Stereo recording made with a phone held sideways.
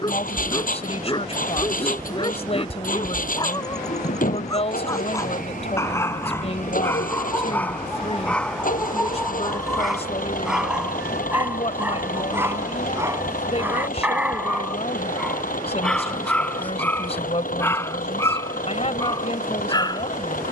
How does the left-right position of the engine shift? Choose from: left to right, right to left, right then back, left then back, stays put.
stays put.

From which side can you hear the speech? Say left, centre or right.
left.